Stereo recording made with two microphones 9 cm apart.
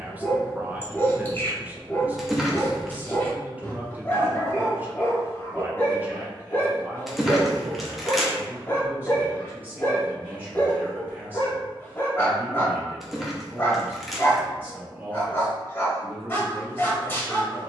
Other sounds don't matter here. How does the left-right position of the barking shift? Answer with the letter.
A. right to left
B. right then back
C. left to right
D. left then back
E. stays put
E.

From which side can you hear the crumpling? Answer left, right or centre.
centre.